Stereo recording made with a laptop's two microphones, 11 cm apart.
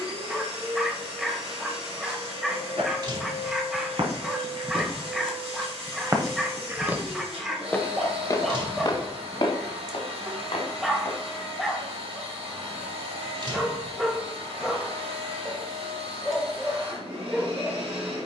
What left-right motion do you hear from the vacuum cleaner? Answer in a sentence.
In this clip you hear the vacuum cleaner stay in one place.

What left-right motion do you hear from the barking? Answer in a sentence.
You can hear the barking stay in one place.